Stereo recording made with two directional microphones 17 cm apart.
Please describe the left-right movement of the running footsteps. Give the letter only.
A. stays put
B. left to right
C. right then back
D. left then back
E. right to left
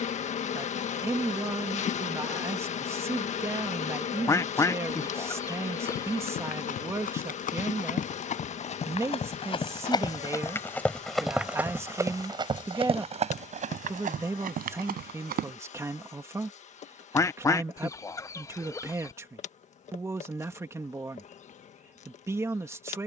B.